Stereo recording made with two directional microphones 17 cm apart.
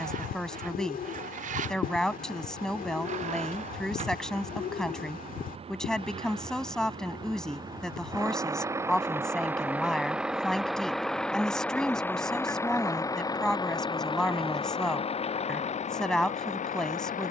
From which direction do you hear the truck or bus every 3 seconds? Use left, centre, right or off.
right, right, right, centre, left, left.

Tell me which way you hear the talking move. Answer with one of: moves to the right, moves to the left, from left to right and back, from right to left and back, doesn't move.
doesn't move.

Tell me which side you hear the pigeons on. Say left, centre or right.
left.